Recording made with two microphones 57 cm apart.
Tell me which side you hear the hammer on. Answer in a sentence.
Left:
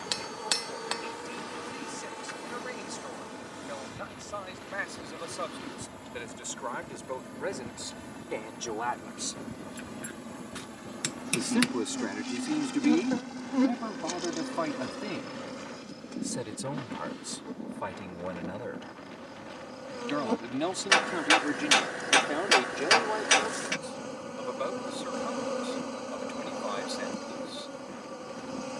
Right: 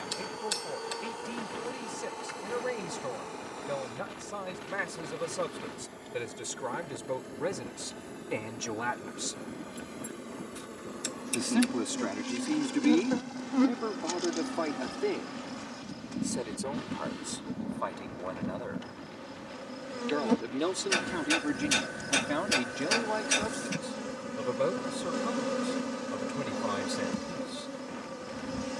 You can hear the hammer on the left.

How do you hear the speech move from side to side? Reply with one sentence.
You can hear the speech go left and come back.